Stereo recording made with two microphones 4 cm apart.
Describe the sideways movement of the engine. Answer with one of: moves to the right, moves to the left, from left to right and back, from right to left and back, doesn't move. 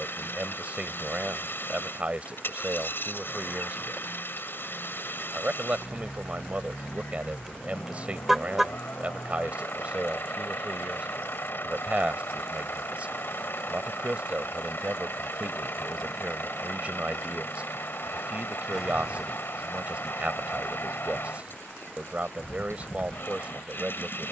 doesn't move.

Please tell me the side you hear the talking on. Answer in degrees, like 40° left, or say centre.
30° right.